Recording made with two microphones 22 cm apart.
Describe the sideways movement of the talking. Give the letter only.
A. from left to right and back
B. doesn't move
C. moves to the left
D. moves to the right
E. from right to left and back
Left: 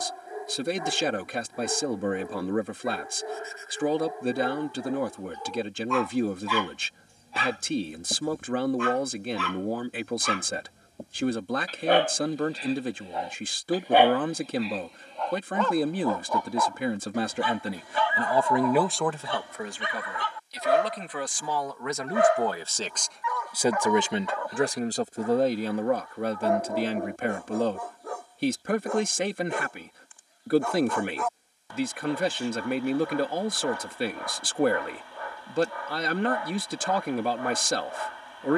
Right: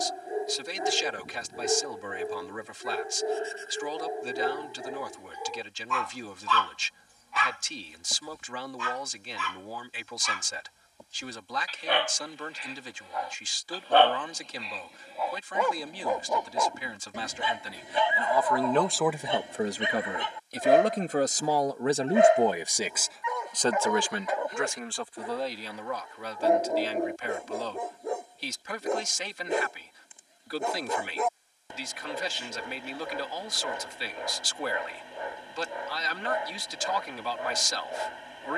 A.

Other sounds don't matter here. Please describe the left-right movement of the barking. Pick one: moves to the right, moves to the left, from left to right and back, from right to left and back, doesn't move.
from right to left and back.